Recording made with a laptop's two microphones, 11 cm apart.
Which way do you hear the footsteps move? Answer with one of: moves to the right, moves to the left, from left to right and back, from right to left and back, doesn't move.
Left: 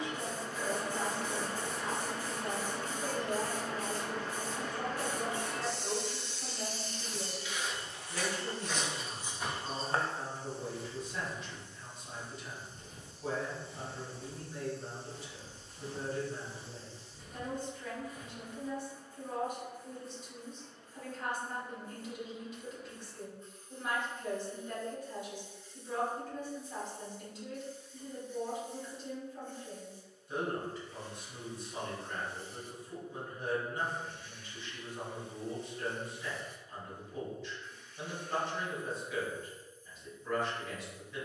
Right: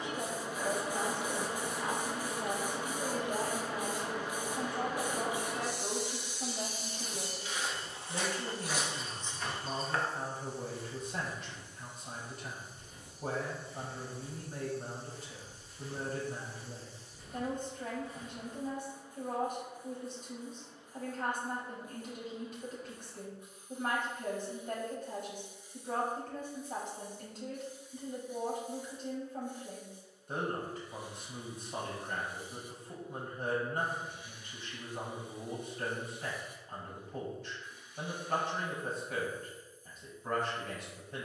from right to left and back.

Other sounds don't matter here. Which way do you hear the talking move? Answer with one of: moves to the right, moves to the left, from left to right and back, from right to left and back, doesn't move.
doesn't move.